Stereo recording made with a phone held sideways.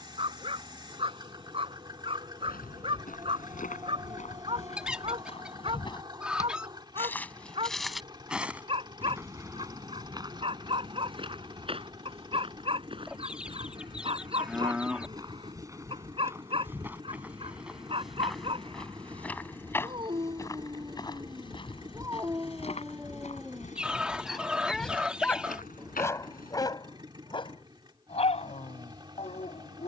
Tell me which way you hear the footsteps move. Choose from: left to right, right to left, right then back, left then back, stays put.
right then back.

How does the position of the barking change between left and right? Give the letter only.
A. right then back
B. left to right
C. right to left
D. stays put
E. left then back
C.